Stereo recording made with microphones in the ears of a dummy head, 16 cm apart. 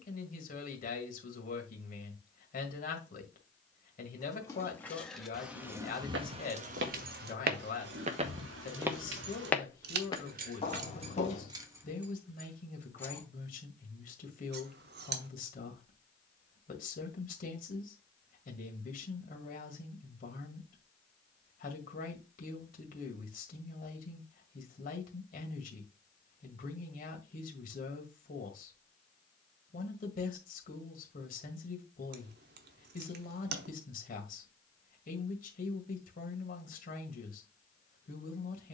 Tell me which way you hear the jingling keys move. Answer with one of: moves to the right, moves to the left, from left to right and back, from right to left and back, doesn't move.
from left to right and back.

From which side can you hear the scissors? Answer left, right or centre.
right.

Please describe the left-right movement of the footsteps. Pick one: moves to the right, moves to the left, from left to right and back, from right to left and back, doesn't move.
moves to the left.